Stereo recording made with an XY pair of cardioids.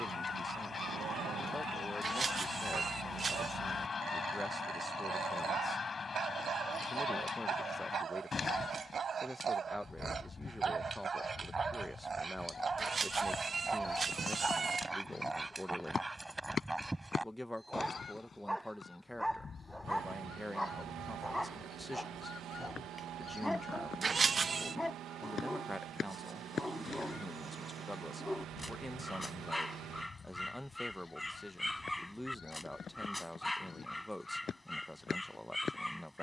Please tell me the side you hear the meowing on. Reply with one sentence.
You can hear the meowing on the right.